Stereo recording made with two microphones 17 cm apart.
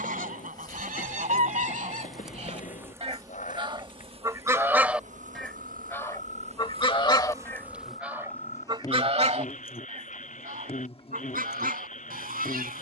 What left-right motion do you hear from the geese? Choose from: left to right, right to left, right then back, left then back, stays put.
left then back.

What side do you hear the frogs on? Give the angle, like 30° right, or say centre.
50° left.